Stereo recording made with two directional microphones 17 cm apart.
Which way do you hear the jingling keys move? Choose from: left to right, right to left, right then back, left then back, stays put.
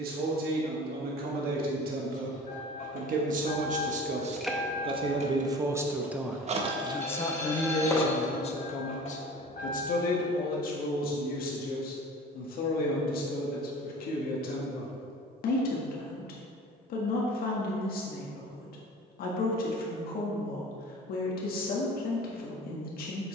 right then back.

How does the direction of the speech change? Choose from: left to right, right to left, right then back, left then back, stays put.
right to left.